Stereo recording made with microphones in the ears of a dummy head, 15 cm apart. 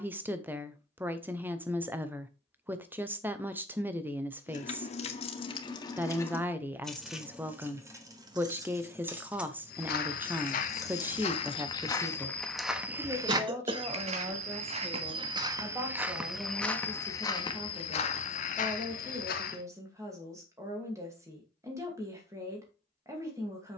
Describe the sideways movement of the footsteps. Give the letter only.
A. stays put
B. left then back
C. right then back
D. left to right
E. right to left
C.